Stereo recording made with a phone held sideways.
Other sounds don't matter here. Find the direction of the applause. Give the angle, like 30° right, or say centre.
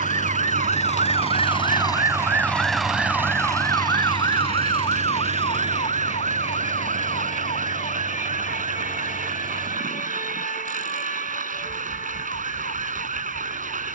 70° right.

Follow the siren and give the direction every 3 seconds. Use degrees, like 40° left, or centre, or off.
30° right, 30° left, 50° left, 60° left, 60° left.